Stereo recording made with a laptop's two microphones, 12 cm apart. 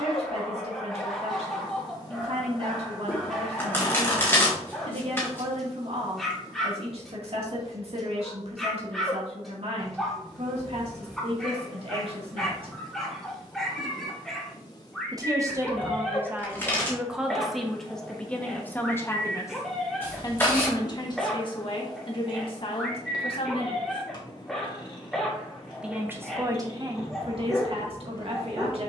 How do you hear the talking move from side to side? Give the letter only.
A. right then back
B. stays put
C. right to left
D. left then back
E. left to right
D.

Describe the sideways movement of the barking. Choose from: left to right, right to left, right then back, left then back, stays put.
stays put.